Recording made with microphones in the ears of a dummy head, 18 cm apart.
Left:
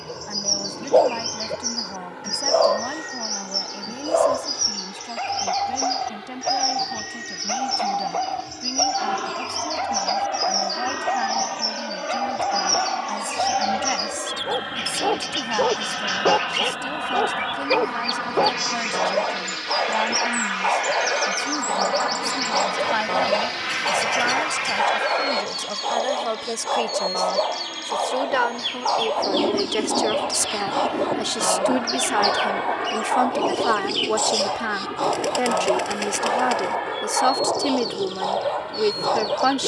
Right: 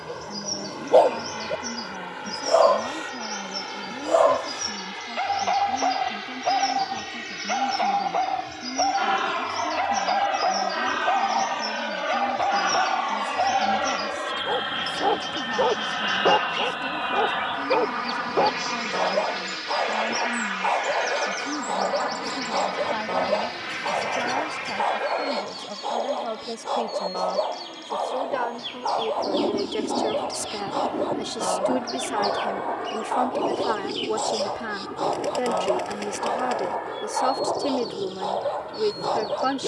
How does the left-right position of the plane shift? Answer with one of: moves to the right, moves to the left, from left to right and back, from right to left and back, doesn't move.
moves to the left.